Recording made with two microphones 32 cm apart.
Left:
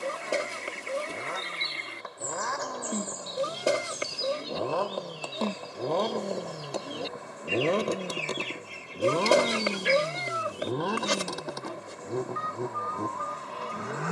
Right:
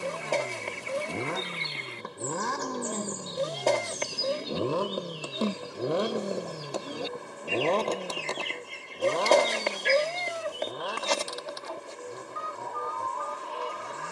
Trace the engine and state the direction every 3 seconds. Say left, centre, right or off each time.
right, right, centre, left, left.